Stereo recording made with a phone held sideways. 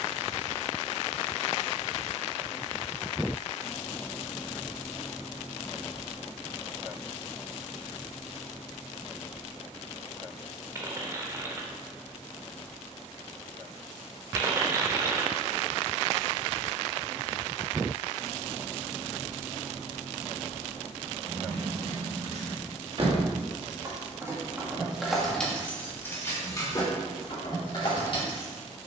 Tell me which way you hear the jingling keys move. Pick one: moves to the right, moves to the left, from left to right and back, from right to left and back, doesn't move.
moves to the left.